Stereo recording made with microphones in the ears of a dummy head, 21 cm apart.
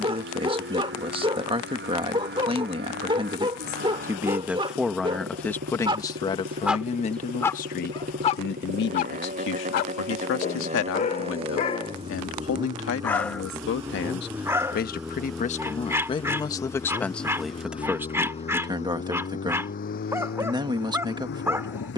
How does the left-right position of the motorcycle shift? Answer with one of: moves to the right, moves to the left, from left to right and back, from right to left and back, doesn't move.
moves to the left.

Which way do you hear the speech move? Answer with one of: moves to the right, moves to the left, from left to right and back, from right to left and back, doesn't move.
from right to left and back.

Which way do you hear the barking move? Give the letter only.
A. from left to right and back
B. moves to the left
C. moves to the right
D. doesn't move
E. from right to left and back
E.